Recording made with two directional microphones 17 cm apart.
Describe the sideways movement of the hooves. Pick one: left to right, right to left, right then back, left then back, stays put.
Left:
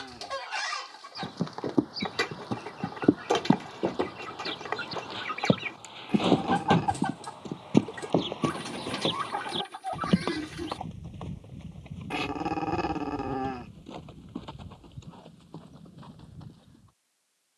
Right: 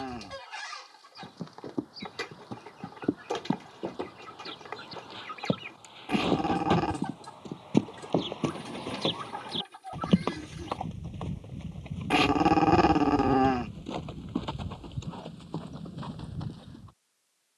left to right.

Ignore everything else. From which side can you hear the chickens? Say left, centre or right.
left.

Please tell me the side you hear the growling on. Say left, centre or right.
right.